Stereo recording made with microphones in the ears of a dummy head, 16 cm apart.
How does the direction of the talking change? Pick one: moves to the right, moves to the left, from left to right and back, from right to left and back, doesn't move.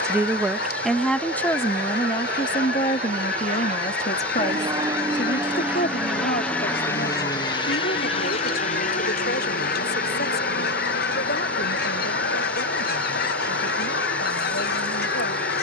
moves to the left.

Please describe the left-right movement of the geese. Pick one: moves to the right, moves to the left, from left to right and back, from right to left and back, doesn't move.
doesn't move.